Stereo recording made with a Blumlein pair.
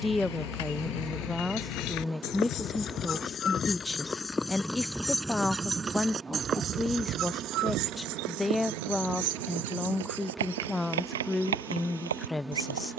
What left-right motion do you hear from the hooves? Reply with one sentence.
You can hear the hooves move from left to right.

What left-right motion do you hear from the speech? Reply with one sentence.
In this clip you hear the speech stay in one place.